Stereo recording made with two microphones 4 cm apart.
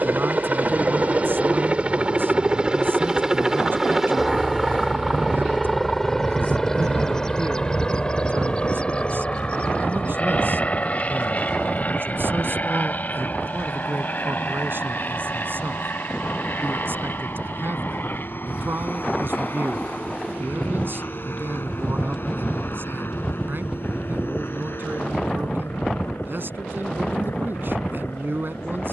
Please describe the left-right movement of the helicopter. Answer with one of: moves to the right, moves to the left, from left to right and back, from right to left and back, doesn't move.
moves to the left.